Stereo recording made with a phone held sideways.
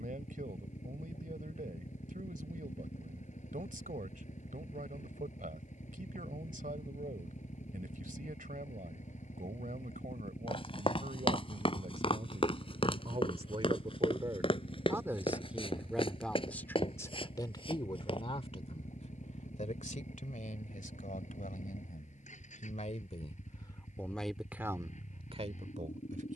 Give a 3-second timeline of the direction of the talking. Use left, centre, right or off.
right, right, right, right, right, centre, left, left, right.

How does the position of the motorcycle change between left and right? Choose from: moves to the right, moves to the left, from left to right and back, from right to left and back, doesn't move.
doesn't move.